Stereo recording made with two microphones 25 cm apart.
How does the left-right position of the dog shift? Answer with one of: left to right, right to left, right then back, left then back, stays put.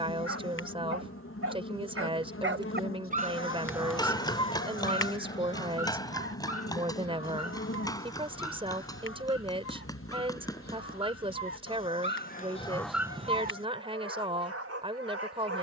left then back.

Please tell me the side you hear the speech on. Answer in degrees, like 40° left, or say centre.
20° right.